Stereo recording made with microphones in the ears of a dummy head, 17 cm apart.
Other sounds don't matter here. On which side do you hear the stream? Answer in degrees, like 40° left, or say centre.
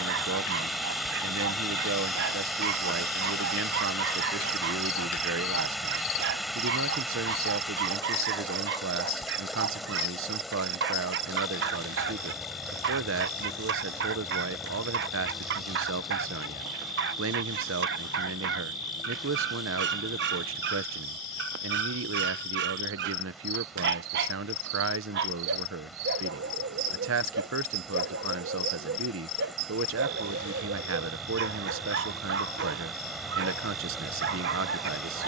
centre.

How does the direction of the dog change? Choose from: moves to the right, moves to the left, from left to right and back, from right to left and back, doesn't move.
doesn't move.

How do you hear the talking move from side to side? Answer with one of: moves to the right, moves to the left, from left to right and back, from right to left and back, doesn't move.
doesn't move.